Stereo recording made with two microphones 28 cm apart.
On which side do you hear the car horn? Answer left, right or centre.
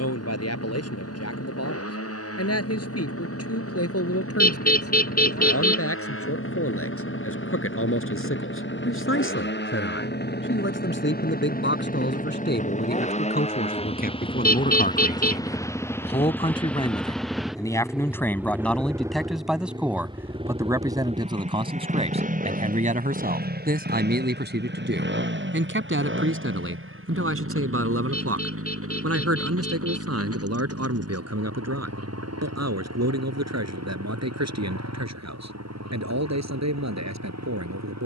left.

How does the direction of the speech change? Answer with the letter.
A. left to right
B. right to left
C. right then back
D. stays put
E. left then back
A.